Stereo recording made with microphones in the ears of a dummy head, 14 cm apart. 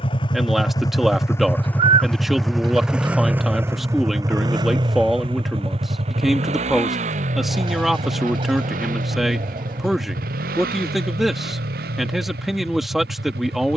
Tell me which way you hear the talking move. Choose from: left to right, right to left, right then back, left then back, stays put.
stays put.